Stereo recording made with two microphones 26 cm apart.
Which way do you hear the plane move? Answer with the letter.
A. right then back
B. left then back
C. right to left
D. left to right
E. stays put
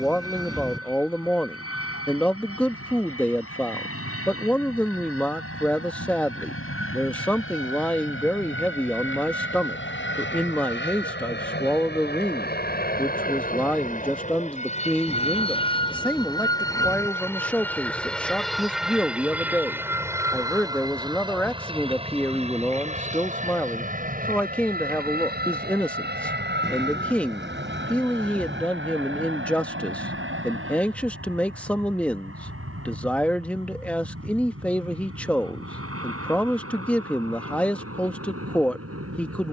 D.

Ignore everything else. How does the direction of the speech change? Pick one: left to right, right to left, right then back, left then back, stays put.
stays put.